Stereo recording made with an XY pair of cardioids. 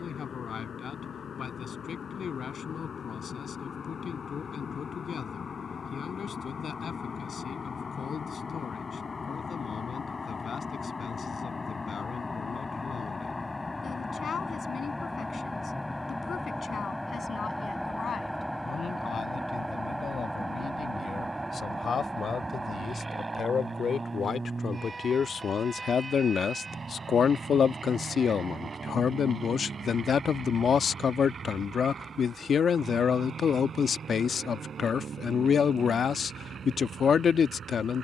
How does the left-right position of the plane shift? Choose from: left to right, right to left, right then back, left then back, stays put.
left to right.